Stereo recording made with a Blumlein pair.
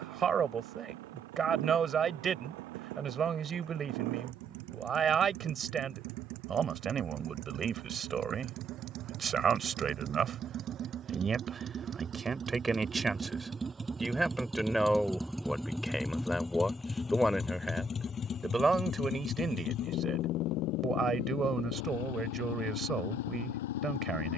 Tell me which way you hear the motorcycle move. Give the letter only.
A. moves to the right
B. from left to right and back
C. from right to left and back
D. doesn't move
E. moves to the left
E.